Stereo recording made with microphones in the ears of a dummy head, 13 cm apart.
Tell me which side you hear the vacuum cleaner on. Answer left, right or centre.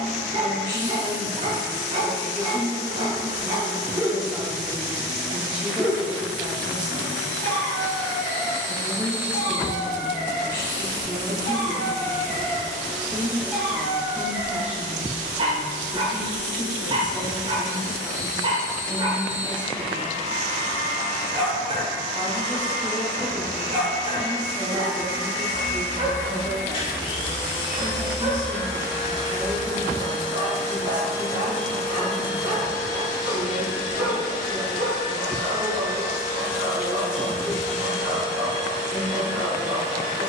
left.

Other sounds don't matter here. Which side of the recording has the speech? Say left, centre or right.
centre.